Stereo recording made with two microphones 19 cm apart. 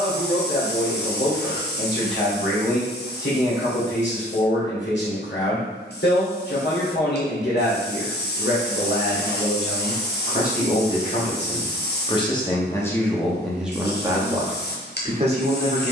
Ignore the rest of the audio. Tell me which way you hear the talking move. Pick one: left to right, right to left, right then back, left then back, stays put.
left to right.